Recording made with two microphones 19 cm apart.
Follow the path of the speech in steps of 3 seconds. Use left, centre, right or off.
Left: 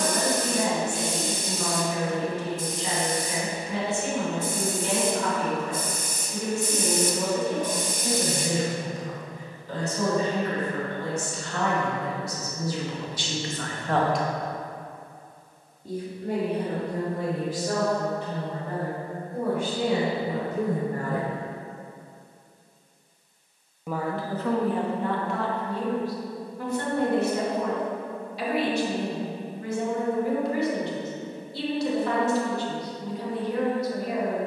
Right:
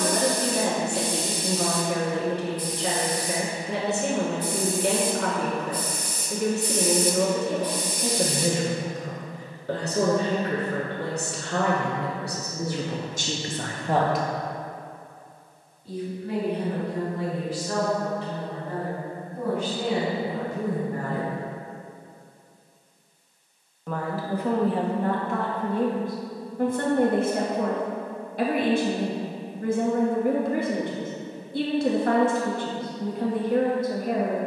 right, right, right, right, right, left, left, left, right, right, right, right.